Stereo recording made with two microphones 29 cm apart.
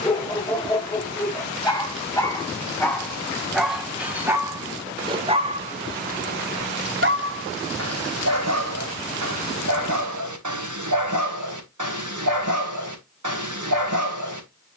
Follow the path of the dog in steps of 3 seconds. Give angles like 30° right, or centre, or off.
10° left, 10° right, 50° right, 80° right, 80° right.